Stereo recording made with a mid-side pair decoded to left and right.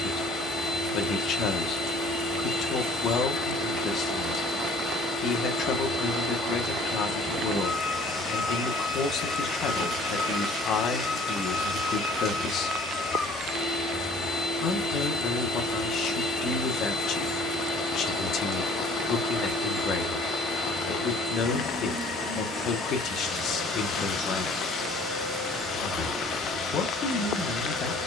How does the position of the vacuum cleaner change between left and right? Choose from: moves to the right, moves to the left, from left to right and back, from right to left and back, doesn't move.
doesn't move.